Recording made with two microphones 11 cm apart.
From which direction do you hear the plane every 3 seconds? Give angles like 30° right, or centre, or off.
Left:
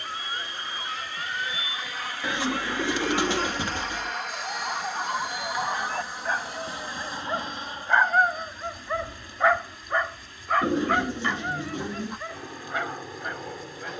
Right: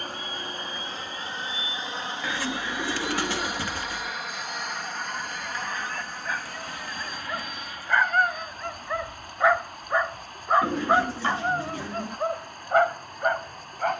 30° right, centre, 20° left, 40° left, 50° left.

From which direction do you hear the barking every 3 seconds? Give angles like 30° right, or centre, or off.
50° left, 40° left, 20° left, 20° right, 50° right.